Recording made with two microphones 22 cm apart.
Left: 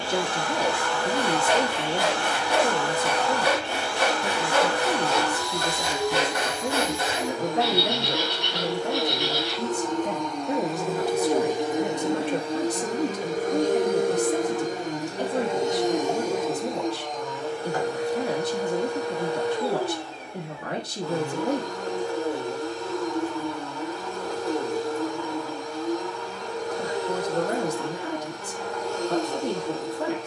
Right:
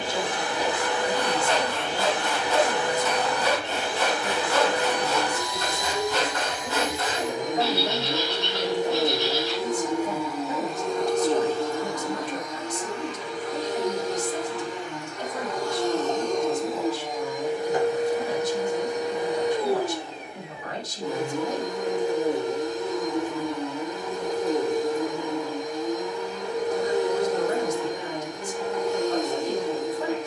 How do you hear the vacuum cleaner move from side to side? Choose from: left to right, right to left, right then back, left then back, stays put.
left then back.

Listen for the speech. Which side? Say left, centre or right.
left.